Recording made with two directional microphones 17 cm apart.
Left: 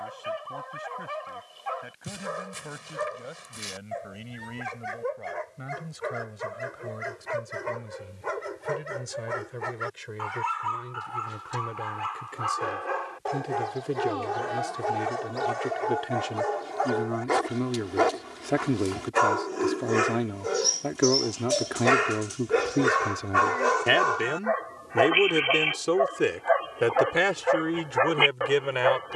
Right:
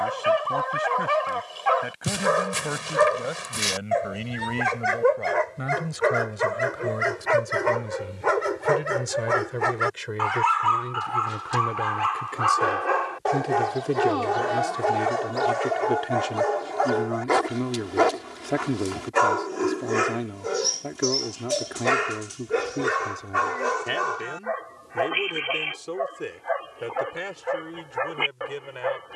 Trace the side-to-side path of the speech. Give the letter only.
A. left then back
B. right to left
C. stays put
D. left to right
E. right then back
B.